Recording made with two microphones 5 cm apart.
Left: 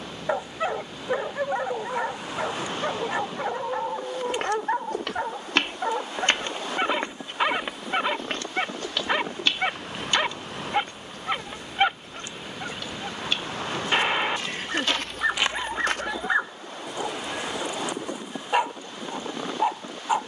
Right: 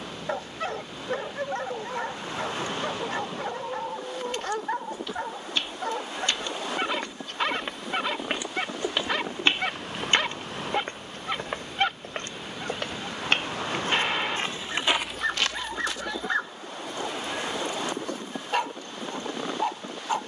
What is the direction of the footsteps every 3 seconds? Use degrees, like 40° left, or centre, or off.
off, 70° left, 10° left, 40° right, 40° right, 30° left, off.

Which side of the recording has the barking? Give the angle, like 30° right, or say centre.
20° left.